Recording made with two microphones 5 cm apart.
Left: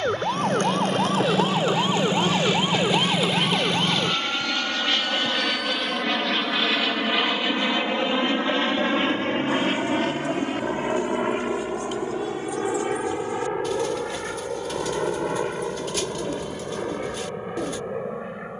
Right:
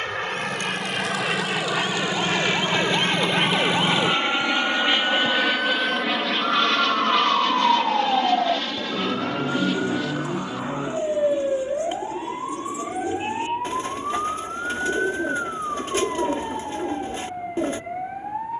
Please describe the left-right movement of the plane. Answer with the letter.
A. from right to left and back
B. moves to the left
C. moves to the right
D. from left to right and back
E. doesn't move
B.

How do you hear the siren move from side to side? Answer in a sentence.
You can hear the siren move to the right.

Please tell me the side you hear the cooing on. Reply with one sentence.
You can hear the cooing on the right.